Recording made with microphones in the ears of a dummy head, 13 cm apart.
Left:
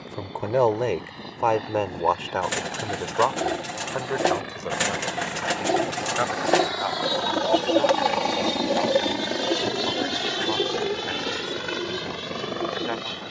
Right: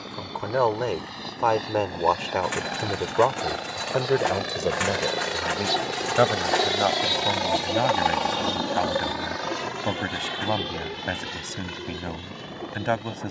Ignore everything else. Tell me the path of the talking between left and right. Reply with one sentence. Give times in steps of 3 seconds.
In this clip you hear the talking in the centre from 0 s and on the right from 3 s.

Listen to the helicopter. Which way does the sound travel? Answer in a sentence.
You can hear the helicopter travel towards the left.